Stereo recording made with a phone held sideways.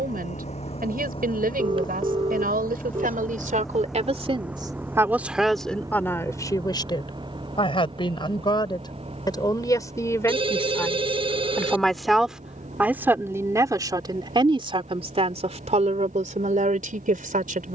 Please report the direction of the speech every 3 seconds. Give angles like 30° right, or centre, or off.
70° right, 30° right, 30° left, 20° left, 20° right, 50° right.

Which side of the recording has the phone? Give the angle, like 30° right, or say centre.
30° right.